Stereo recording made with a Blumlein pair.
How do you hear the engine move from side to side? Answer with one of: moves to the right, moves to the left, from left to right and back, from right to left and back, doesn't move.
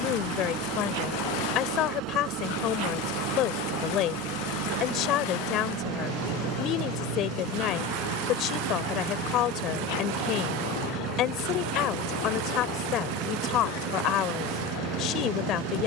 doesn't move.